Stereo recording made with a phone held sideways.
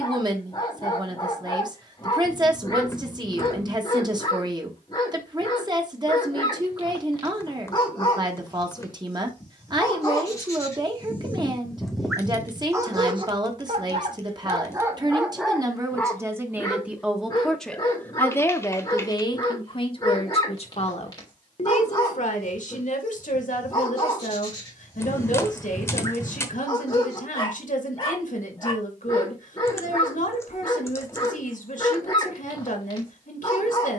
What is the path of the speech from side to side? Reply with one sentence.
You can hear the speech travel towards the left.